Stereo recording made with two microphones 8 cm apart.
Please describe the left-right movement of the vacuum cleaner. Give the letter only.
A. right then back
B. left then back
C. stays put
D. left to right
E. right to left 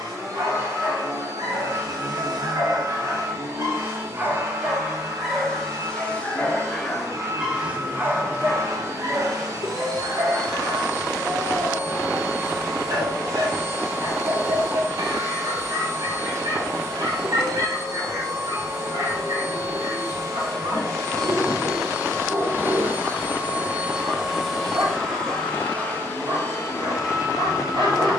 E.